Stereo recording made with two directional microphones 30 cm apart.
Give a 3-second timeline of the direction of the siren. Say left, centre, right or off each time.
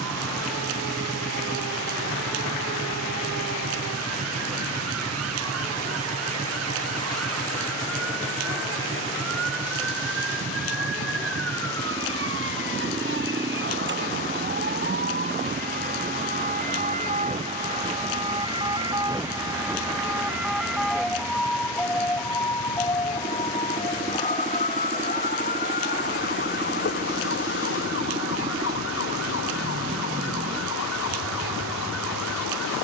right, right, right, right, right, right, centre, centre, left, left, left.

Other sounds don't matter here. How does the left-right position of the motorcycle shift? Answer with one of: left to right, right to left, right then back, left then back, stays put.
stays put.